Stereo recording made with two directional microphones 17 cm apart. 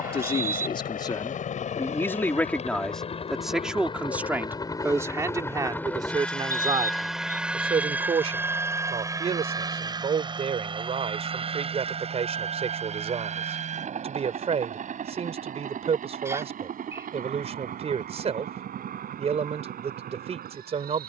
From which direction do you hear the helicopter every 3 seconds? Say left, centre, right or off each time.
left, left, centre, right, right, right, right.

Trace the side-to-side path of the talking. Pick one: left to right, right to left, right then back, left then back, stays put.
left to right.